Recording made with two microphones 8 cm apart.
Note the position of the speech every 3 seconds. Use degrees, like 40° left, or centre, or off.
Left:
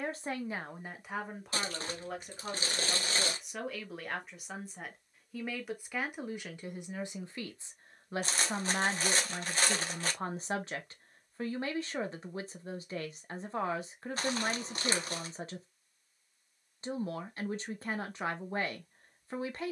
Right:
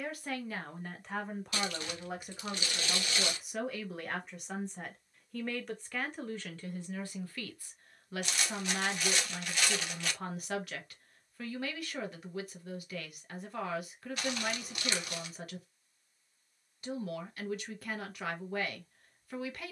10° left, centre, 20° left, 30° left, 30° left, 30° left, 30° left.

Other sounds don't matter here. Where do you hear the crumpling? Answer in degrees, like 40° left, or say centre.
40° left.